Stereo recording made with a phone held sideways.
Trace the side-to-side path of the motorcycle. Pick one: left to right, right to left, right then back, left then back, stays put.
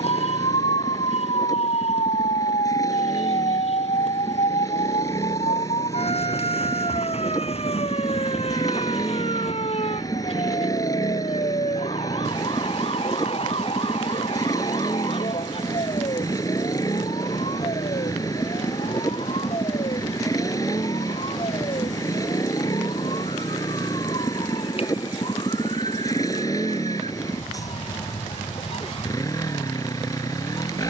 stays put.